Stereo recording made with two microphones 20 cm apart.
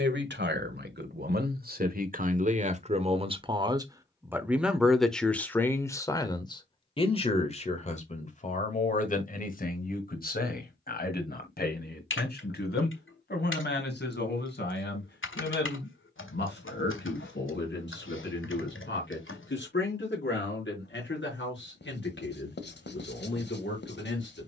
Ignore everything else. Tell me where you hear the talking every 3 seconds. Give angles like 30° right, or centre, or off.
50° right, 10° right, 30° left, 50° left, 60° left, 60° left, 60° left, 70° left.